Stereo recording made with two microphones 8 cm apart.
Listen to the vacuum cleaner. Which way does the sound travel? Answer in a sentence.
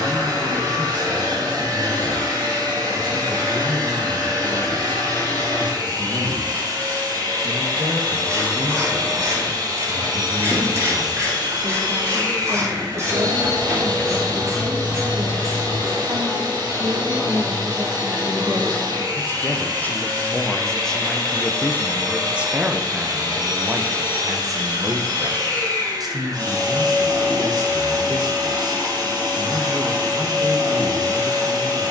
You can hear the vacuum cleaner stay put.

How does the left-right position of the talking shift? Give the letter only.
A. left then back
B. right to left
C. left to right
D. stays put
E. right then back
A.